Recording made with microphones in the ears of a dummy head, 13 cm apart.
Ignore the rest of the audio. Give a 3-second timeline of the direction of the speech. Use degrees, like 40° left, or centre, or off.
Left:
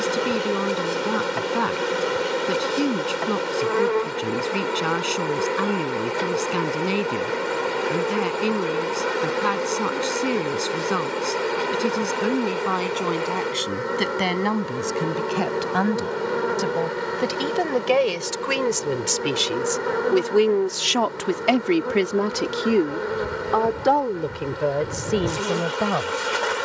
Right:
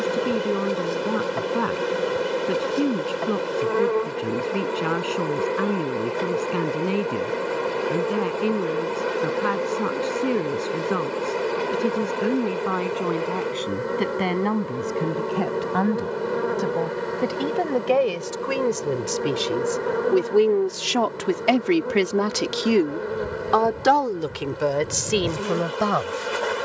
80° left, 80° left, 80° left, 80° left, 80° left, 70° left, 50° left, 20° right, 60° right.